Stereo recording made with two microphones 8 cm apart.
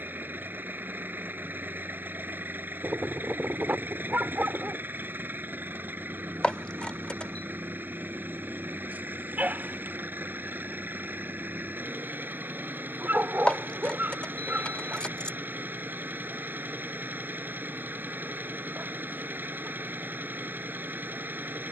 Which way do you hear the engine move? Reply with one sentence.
You can hear the engine stay put.